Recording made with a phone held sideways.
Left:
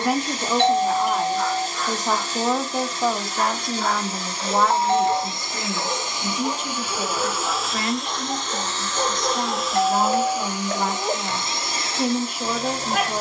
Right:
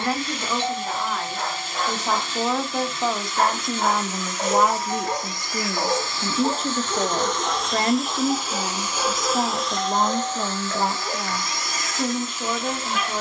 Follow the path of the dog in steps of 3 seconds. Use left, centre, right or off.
right, right, centre, left, left.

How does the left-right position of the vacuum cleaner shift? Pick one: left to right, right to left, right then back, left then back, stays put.
right then back.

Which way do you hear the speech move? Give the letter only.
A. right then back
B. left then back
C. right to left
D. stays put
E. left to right
A.